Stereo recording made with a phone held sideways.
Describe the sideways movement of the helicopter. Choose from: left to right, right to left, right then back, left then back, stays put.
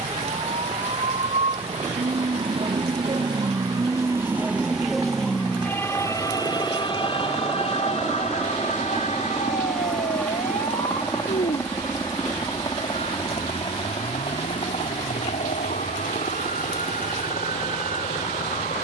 right to left.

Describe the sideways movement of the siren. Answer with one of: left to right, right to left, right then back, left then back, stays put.
right to left.